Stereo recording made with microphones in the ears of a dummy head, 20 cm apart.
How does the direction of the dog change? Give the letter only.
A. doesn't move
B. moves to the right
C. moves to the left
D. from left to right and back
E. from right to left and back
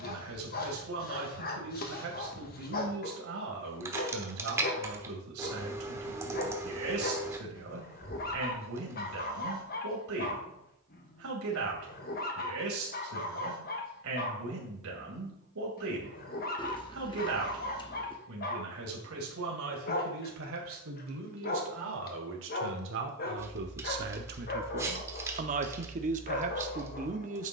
A.